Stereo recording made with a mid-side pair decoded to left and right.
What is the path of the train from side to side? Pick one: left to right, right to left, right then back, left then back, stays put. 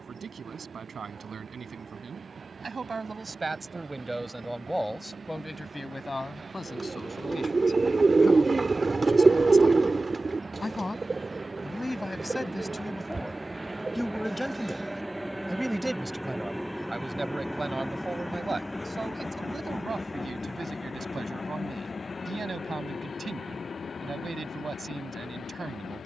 right to left.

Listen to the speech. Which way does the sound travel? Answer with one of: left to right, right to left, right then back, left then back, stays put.
left then back.